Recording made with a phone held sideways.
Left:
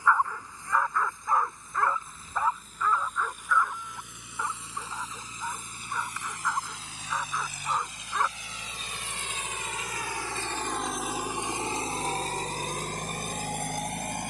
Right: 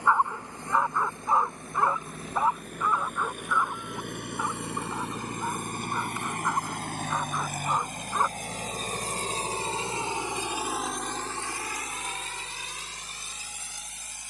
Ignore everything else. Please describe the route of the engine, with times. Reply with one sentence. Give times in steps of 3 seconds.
You can hear the engine on the right from 0 s, in the centre from 9 s and on the left from 12 s.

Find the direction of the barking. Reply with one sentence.
In this clip you hear the barking on the right.